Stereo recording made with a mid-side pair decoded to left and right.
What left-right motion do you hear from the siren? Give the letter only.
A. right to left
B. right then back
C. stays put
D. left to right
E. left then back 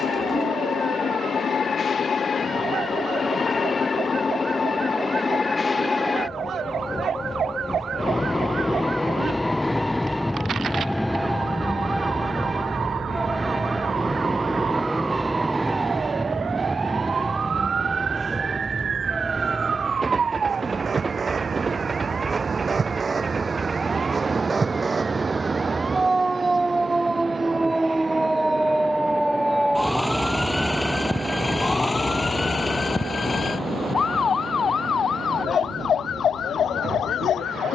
A.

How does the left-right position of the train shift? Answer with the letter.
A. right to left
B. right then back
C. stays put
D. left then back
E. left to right
E.